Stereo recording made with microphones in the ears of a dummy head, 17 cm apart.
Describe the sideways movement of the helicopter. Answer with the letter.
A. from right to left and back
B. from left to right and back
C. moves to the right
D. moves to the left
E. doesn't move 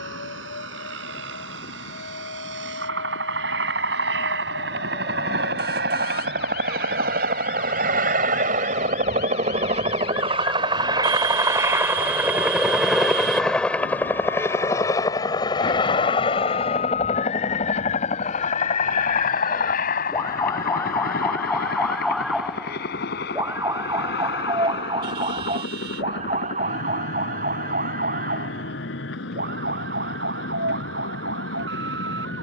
D.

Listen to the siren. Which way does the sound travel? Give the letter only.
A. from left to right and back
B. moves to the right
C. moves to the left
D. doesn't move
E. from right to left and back
B.